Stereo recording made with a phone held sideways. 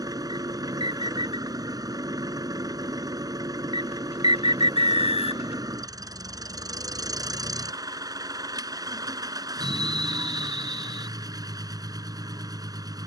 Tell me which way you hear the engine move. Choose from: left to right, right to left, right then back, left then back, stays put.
stays put.